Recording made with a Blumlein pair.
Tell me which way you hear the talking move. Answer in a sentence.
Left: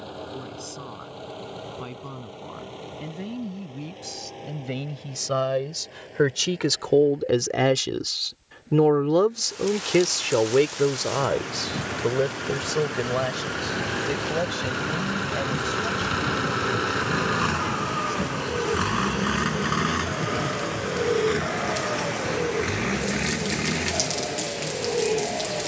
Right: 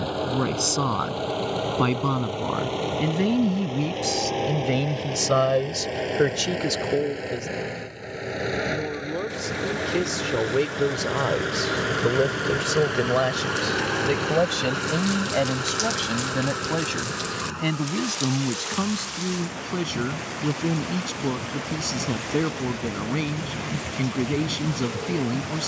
You can hear the talking move from right to left and back again.